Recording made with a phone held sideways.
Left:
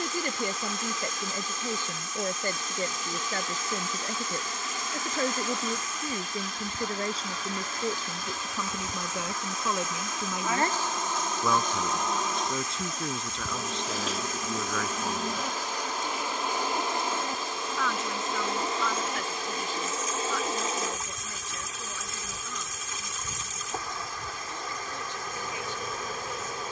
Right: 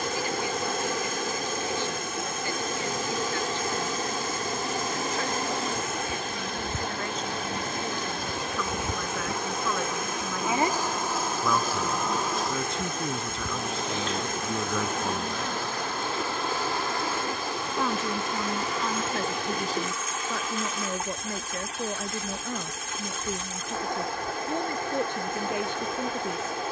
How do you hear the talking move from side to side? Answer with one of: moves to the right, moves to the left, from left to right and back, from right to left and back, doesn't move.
moves to the right.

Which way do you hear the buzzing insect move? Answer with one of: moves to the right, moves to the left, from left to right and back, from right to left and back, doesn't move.
moves to the left.